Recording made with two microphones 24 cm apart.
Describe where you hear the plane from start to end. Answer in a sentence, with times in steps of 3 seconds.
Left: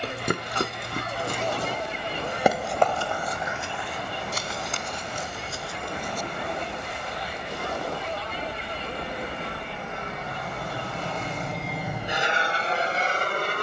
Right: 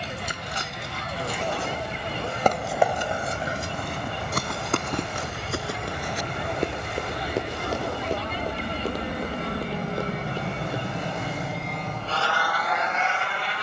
You can hear the plane on the right from 0 s and on the left from 12 s.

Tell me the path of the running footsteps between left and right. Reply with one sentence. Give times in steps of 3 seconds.
You can hear the running footsteps on the left from 0 s, on the right from 3 s and not at all from 12 s.